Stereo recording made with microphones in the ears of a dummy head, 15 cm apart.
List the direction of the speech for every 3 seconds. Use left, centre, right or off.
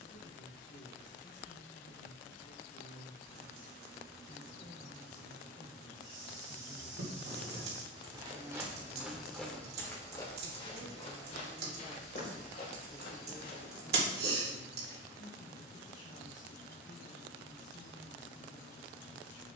left, left, centre, right, left, left, left.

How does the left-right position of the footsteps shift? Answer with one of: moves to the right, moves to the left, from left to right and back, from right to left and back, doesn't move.
moves to the left.